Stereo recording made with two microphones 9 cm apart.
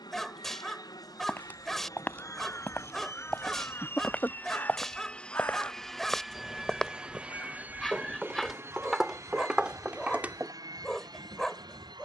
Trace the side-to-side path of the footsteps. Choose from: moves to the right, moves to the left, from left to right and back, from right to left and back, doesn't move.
moves to the right.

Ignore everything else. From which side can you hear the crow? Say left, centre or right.
left.